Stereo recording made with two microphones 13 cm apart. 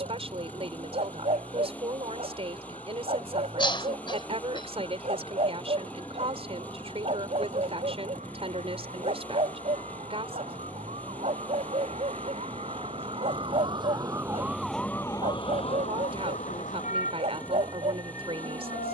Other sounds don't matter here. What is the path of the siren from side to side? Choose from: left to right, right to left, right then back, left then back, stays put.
right to left.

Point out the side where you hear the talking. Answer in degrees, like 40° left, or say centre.
50° right.